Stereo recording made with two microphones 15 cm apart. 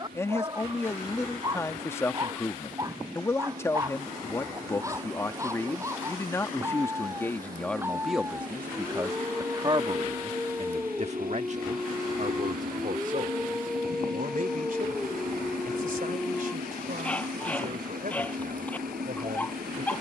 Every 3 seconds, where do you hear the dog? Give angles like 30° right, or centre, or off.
30° right, 20° right, 20° right, 10° right, centre, 10° left, 10° left.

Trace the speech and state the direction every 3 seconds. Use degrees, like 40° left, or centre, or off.
20° left, 20° left, 10° left, 40° right, 60° right, 70° right, 70° right.